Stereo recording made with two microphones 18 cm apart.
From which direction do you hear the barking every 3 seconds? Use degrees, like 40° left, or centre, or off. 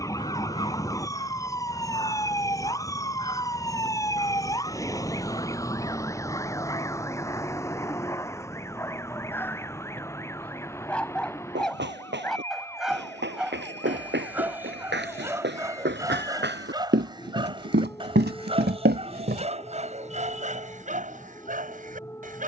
30° left, 30° left, 20° left, 10° left, 10° right, 20° right, 40° right, 50° right.